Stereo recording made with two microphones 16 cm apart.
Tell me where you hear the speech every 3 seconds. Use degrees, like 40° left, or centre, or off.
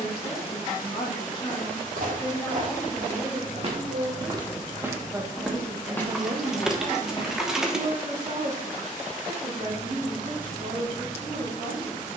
30° left, 10° right, 50° right, 70° right.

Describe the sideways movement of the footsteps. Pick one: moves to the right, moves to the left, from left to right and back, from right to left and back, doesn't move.
moves to the left.